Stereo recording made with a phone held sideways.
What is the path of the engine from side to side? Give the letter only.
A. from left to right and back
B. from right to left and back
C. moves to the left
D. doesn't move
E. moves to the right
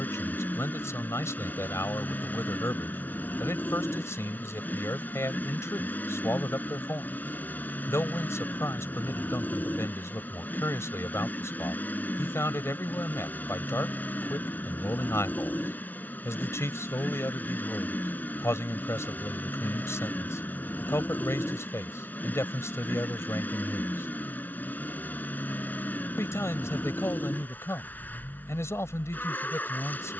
D.